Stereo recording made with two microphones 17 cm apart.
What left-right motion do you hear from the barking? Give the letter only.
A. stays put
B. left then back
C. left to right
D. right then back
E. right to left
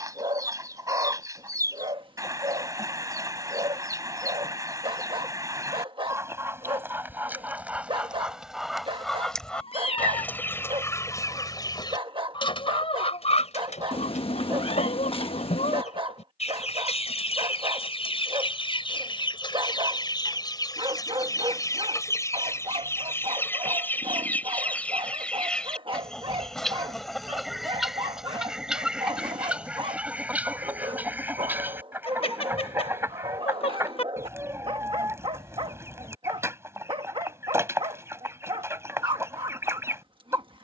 A.